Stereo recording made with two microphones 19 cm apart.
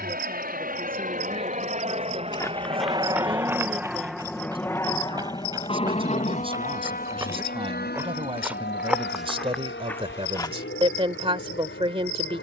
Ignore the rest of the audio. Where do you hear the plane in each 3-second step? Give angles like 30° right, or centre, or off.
40° right, 10° left, 50° left, 60° left.